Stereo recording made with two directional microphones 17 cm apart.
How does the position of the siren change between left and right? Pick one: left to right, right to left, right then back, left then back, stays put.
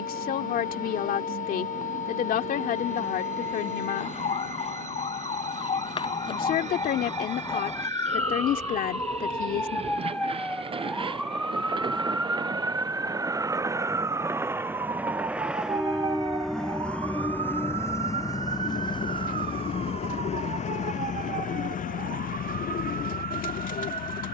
left to right.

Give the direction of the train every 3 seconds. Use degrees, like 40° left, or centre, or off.
50° right, 50° right, 40° right, 30° right, 20° right, centre, 30° left, 60° left.